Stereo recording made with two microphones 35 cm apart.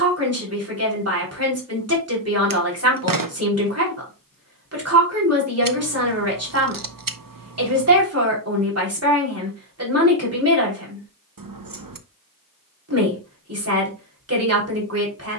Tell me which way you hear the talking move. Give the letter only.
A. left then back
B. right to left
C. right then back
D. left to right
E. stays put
E.